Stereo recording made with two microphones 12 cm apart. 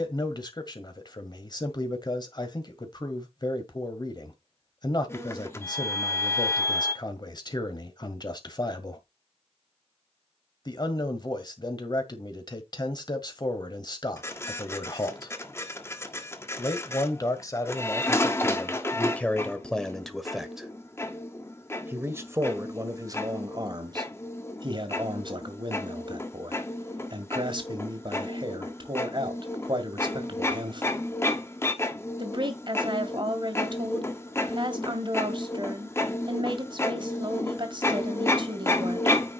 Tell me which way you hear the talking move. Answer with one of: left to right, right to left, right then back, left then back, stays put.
left to right.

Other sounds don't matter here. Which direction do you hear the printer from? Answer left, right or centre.
left.